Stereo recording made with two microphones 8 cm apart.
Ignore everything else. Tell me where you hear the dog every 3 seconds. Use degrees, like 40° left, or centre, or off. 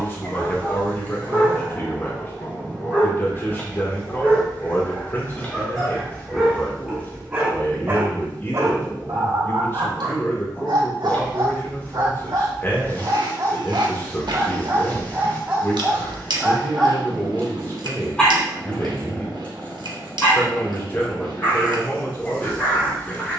30° left, 20° left, 20° right, 70° right, 50° right, 10° right, 20° left, 30° left.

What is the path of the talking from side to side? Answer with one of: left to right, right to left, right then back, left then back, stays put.
stays put.